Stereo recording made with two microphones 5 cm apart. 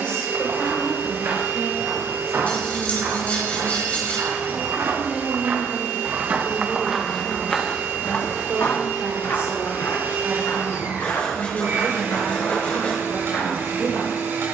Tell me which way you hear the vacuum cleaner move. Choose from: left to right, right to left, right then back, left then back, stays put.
stays put.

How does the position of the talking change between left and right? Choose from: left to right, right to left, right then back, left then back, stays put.
right then back.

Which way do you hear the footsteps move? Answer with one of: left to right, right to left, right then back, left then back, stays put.
right to left.